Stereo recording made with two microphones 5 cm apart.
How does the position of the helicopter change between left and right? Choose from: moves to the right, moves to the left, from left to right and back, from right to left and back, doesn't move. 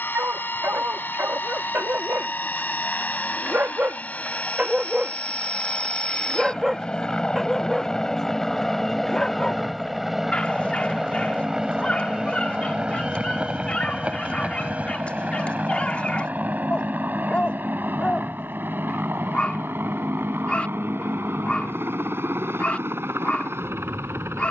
moves to the right.